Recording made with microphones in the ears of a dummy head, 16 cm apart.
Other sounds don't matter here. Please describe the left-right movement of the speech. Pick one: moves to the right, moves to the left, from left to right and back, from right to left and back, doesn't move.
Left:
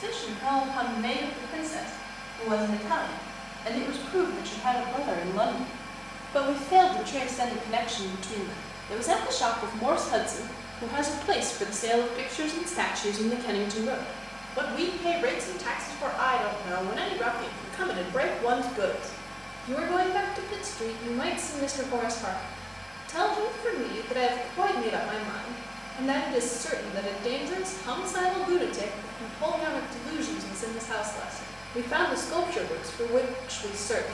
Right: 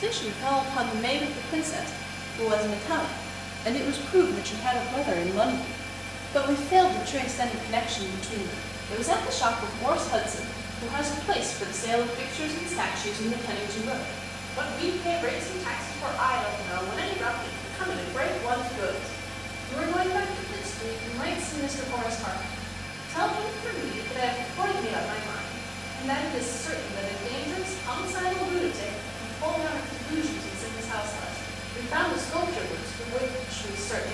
moves to the left.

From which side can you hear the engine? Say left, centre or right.
right.